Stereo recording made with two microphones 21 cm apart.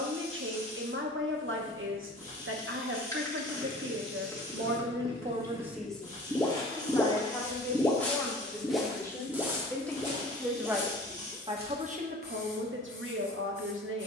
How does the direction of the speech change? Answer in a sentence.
You can hear the speech go left and come back.